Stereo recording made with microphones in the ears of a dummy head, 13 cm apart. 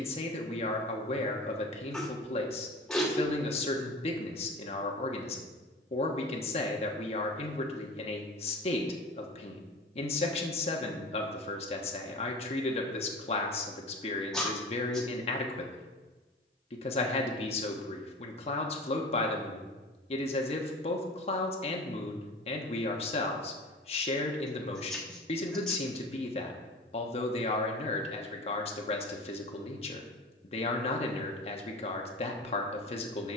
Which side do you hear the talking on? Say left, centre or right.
left.